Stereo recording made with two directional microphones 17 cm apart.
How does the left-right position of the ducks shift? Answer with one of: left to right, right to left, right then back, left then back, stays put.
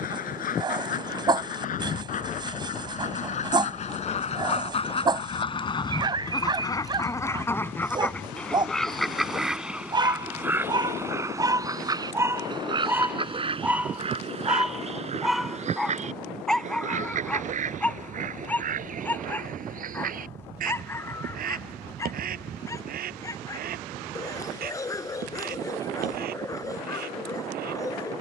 left to right.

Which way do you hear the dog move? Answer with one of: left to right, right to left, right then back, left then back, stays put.
right to left.